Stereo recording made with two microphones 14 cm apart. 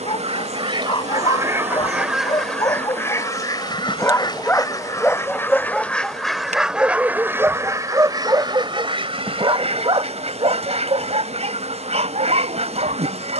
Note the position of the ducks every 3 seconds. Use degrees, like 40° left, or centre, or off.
20° right, 20° left, 20° right, 50° right, 50° right.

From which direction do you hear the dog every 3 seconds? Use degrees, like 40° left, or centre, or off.
30° left, 10° left, 10° right, 40° right, 50° right.